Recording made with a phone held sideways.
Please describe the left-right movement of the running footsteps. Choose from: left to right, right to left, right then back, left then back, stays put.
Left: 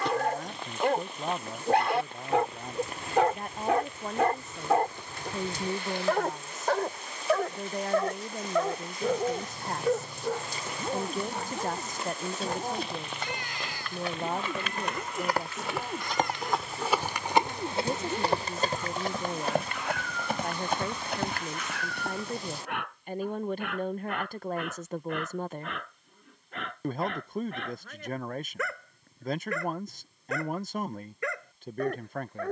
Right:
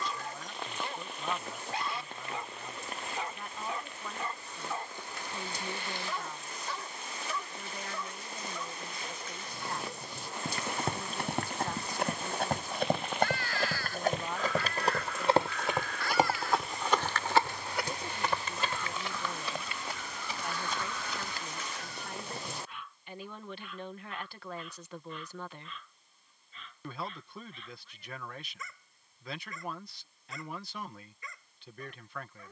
right to left.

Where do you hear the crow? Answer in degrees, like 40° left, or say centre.
20° left.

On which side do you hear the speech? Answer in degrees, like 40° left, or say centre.
50° left.